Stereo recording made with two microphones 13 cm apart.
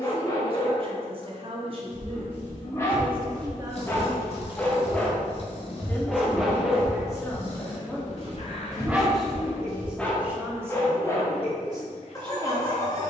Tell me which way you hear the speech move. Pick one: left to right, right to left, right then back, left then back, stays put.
left then back.